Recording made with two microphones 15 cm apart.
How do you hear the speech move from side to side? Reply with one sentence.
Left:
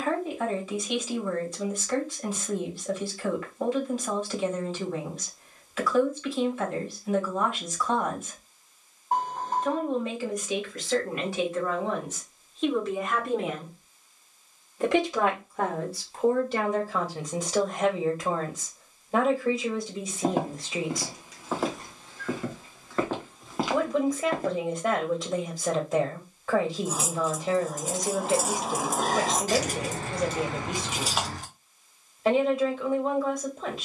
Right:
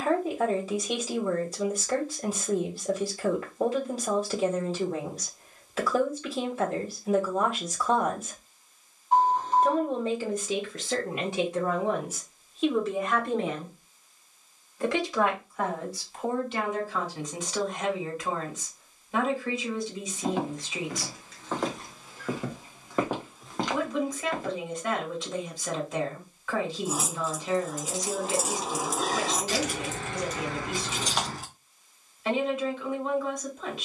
In this clip you hear the speech move from right to left.